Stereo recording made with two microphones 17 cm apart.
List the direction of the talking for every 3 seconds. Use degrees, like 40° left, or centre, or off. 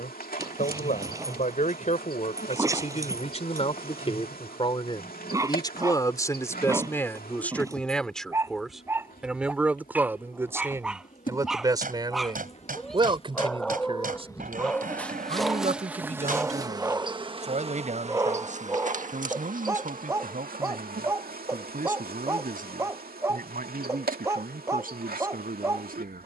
50° left, 30° left, 10° left, 10° right, 30° right, 40° right, 50° right, 60° right, 60° right.